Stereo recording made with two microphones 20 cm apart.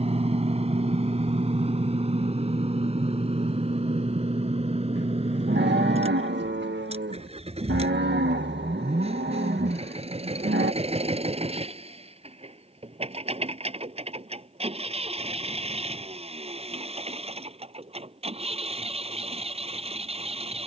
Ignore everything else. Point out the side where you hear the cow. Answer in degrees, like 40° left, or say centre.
60° right.